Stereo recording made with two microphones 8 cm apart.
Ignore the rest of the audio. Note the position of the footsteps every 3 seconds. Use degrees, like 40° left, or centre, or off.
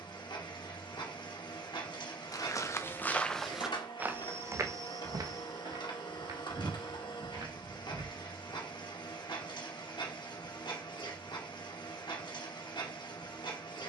40° left, 30° right, 60° right, off, off.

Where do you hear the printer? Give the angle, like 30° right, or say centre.
60° left.